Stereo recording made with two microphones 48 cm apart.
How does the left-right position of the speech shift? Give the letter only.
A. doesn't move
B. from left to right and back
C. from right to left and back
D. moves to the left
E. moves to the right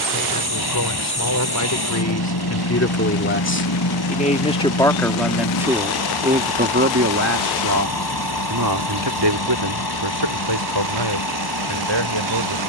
E.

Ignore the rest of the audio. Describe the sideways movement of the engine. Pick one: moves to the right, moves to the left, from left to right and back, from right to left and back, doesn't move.
doesn't move.